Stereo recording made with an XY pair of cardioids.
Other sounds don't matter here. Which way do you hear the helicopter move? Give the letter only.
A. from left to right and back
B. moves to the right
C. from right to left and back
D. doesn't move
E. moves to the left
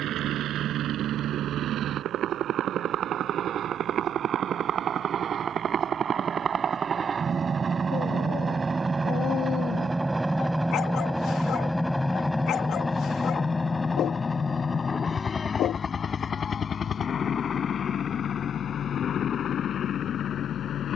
E.